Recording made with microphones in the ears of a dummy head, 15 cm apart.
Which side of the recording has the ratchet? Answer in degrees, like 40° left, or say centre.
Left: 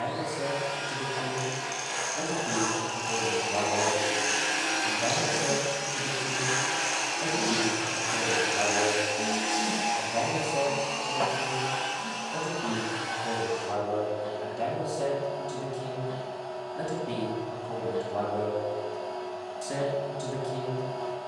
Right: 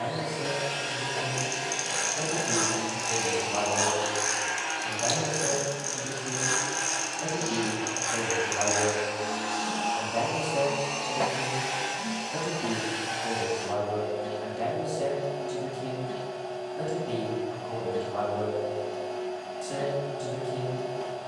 50° right.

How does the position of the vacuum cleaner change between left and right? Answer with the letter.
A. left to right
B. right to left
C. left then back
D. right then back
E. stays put
C.